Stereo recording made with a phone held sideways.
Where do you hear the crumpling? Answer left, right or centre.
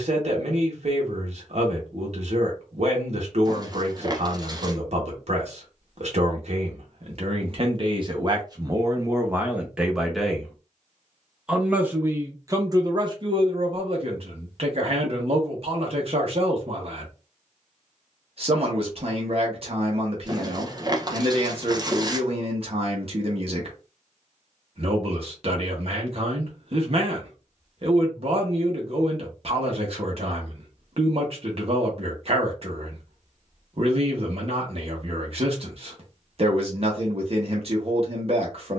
right.